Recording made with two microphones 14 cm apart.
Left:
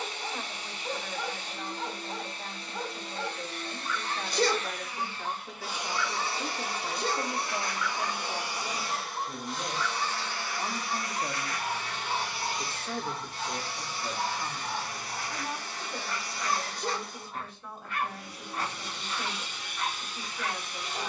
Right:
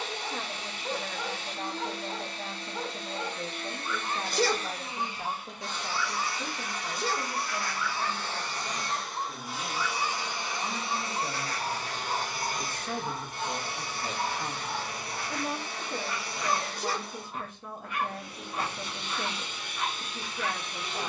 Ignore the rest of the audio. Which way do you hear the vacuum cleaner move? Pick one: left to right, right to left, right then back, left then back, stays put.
left then back.